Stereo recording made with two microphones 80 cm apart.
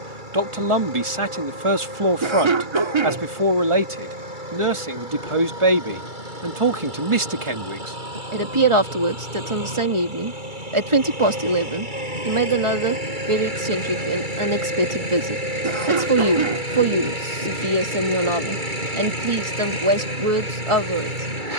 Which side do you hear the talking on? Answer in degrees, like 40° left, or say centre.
40° right.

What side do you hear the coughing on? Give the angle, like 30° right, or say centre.
40° right.